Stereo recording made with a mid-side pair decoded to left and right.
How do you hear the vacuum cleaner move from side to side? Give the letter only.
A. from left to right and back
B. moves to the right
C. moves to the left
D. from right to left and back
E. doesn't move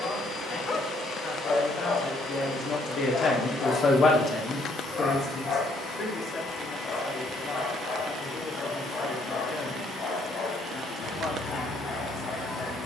E.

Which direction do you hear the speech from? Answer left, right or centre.
left.